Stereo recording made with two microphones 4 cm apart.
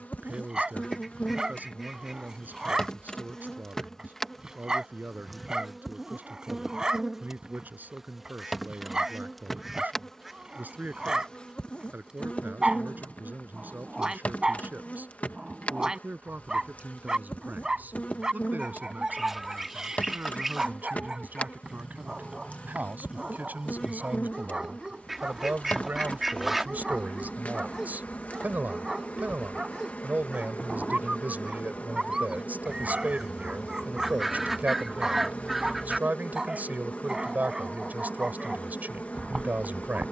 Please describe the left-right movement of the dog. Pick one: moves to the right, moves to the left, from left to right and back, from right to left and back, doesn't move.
doesn't move.